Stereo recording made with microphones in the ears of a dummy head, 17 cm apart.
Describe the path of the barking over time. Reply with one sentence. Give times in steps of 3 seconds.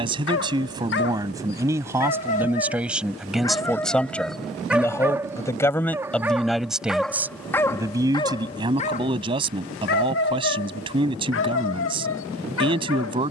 You can hear the barking on the left from 0 s, in the centre from 3 s and on the left from 9 s.